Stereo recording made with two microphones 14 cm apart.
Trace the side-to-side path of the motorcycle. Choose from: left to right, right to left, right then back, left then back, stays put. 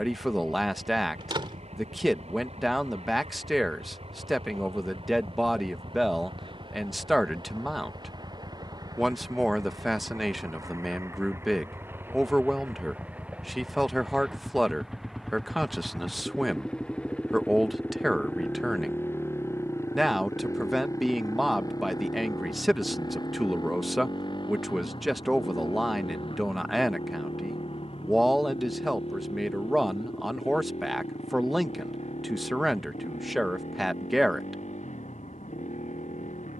right to left.